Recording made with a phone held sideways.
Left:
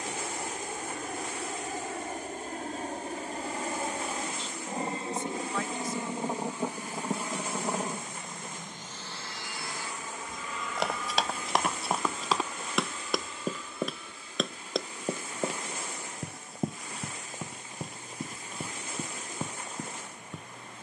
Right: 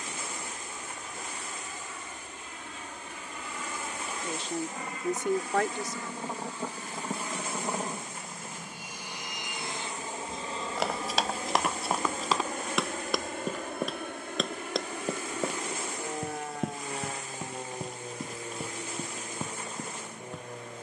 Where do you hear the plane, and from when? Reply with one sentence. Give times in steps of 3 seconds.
You can hear the plane on the left from 0 s, in the centre from 6 s and on the right from 9 s.